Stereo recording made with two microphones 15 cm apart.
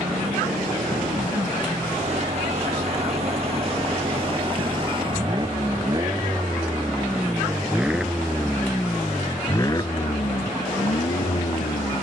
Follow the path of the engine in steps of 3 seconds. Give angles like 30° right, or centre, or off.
50° right, 40° right, 10° right, 40° left.